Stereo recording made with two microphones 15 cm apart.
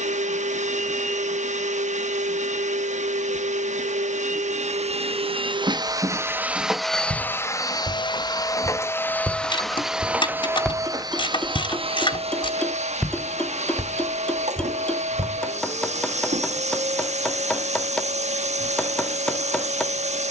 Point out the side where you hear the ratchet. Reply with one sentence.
In this clip you hear the ratchet on the left.